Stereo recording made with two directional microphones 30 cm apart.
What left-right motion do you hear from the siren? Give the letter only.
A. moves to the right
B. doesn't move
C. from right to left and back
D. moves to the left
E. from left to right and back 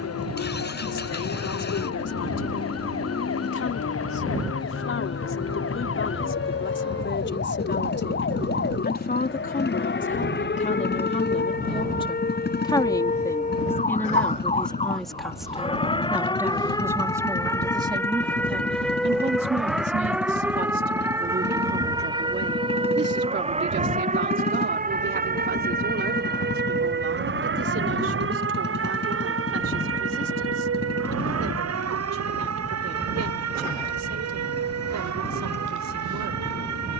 A.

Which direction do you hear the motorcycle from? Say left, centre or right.
left.